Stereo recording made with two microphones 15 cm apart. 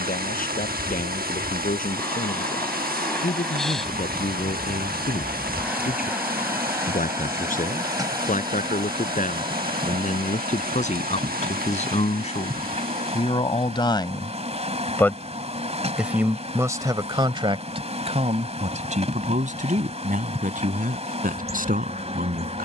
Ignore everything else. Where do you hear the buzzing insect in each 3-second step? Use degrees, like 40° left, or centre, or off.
10° left, centre, 20° right, 40° right, 50° right, 50° right, 50° right, 50° right.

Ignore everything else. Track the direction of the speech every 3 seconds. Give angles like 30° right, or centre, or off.
70° left, 70° left, 60° left, 60° left, 40° left, 20° right, 60° right, 70° right.